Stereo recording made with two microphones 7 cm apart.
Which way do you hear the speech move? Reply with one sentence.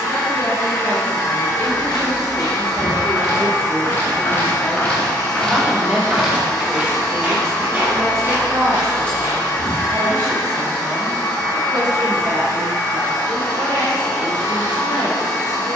You can hear the speech move to the right.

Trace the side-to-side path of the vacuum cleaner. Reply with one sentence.
You can hear the vacuum cleaner stay put.